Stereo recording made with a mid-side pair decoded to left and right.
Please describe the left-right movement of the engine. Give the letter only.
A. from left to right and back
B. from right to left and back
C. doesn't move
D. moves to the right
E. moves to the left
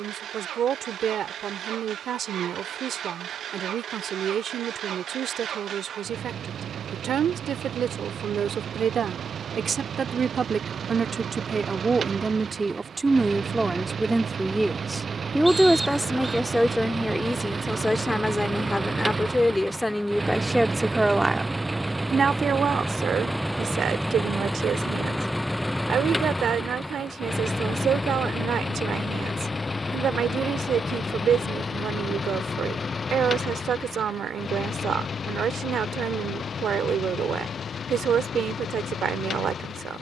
E.